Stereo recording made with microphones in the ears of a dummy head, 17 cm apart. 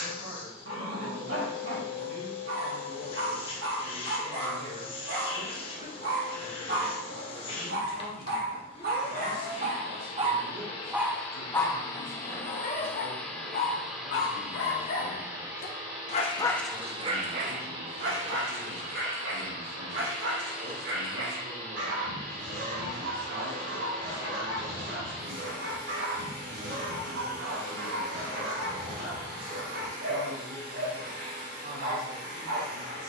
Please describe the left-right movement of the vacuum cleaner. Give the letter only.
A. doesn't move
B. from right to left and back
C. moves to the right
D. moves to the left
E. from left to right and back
C.